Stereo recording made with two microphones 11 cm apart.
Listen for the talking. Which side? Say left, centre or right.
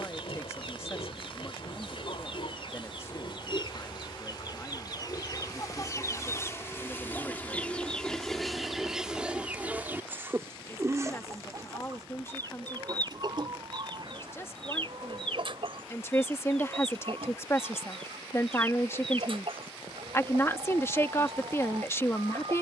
left.